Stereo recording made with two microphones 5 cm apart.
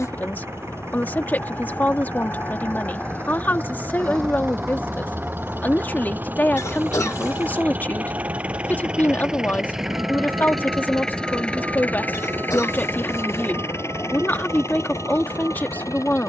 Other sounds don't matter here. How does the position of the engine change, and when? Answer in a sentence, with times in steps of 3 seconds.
You can hear the engine on the right from 0 s, in the centre from 9 s and on the left from 12 s.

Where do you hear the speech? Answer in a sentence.
In this clip you hear the speech on the left.